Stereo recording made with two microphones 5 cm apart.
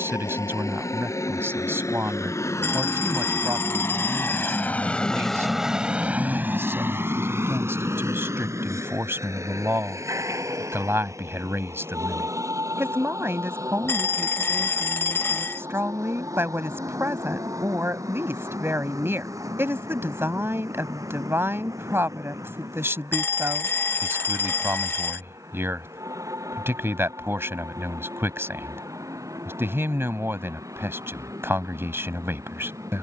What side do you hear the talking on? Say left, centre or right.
right.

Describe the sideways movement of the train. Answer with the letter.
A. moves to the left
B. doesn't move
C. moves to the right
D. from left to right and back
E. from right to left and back
C.